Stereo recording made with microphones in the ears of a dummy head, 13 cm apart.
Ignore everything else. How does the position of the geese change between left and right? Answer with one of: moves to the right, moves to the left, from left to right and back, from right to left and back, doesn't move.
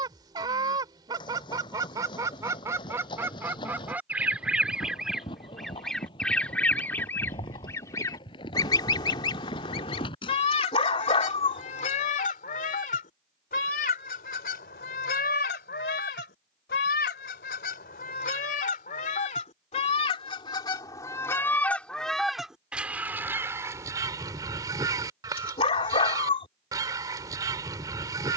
from right to left and back.